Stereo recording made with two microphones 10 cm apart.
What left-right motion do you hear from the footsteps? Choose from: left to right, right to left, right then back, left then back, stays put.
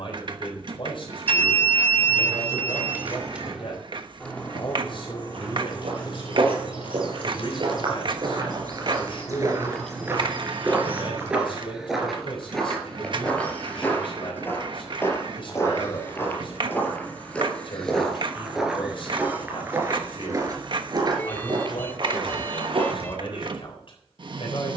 left then back.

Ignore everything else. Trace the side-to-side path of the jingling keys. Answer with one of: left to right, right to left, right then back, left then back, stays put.
left then back.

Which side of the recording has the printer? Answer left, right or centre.
right.